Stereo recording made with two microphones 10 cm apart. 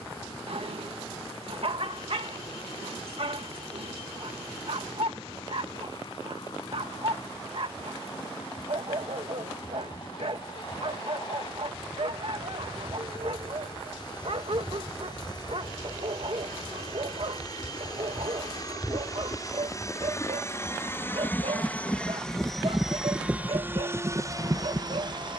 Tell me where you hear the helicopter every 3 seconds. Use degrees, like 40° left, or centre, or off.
50° left, 50° left, 50° left, 50° left, 50° left, 40° left, 30° left, centre, 40° right.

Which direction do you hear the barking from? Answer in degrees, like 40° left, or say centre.
60° right.